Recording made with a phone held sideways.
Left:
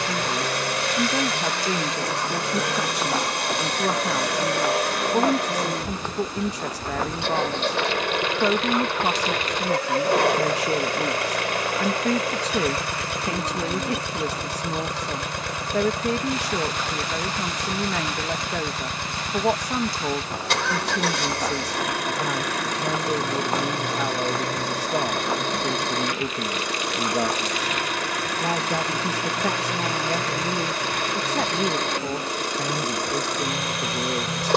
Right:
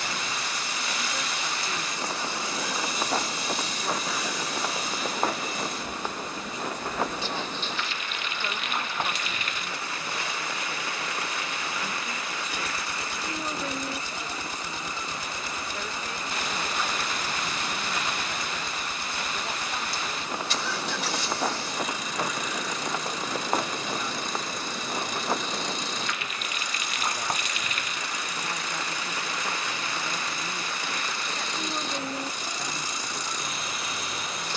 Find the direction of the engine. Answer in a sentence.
In this clip you hear the engine on the left.